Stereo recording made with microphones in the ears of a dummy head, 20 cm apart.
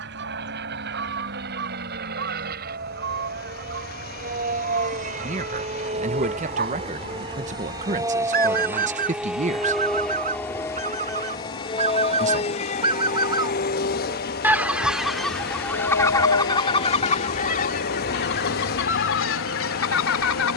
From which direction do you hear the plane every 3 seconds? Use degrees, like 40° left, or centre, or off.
50° right, 40° right, 20° right, 10° left, 40° left, 60° left, 70° left.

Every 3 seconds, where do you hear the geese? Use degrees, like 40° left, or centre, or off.
50° right, 50° right, 50° right, 40° right, 20° right, 20° left, 60° left.